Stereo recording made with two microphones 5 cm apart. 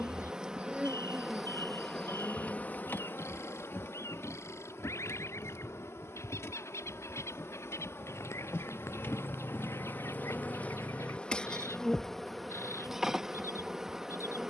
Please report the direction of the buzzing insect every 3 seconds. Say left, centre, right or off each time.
centre, left, left, left, centre.